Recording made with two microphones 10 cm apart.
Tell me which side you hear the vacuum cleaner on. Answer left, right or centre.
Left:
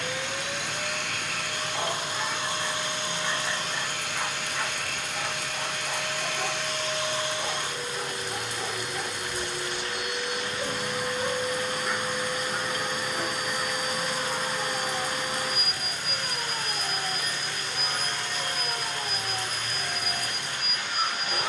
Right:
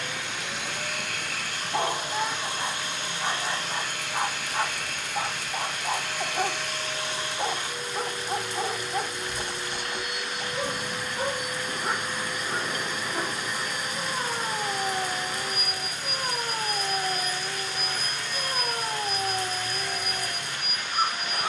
left.